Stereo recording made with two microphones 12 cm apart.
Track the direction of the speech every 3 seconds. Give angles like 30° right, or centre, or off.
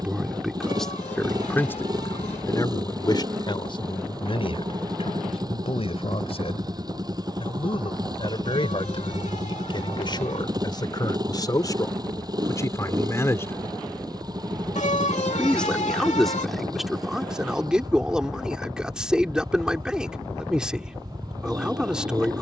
10° left, 50° left, 50° left, 40° left, 20° left, centre, 10° right, 10° right.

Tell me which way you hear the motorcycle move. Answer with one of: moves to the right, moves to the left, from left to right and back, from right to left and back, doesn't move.
doesn't move.